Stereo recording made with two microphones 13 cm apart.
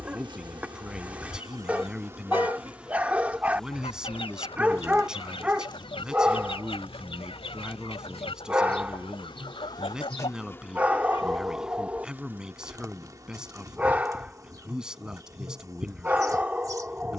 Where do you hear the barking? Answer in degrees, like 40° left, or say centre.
10° right.